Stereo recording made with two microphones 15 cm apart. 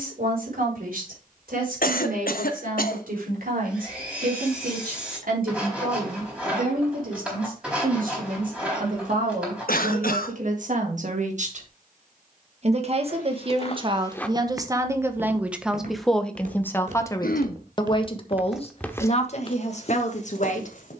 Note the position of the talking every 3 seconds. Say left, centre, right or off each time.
right, right, right, right, right, centre, left.